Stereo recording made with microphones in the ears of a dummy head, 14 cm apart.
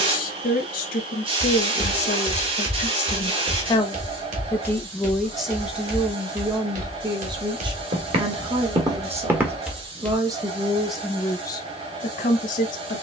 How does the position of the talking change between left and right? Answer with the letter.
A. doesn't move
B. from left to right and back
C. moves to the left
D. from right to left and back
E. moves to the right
B.